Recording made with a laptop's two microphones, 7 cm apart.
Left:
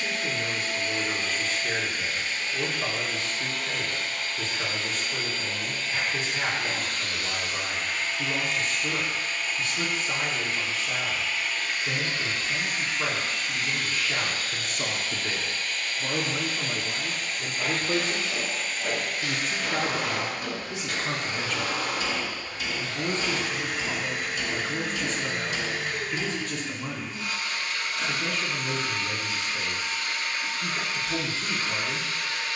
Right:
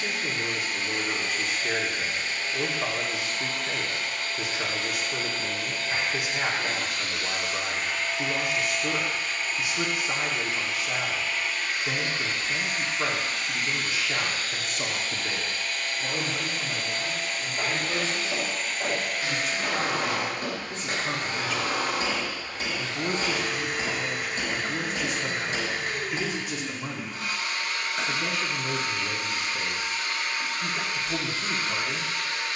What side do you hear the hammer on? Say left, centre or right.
right.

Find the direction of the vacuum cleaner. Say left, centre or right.
right.